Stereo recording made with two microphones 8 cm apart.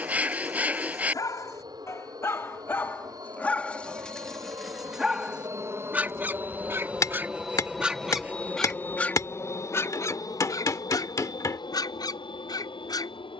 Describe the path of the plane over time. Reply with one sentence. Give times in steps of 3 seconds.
In this clip you hear the plane on the right from 0 s, in the centre from 6 s and on the left from 9 s.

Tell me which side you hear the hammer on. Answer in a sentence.
In this clip you hear the hammer on the left.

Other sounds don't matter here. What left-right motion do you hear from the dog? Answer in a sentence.
In this clip you hear the dog go right and come back.